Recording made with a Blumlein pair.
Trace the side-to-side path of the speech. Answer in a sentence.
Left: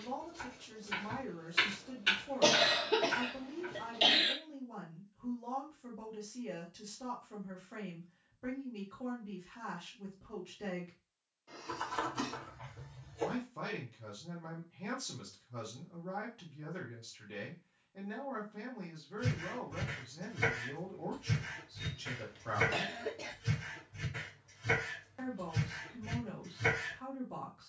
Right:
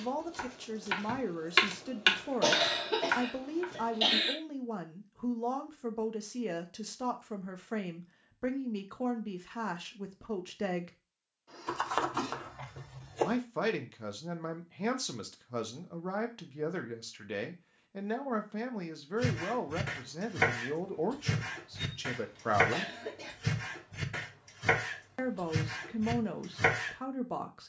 In this clip you hear the speech stay in one place.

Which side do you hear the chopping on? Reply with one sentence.
You can hear the chopping on the right.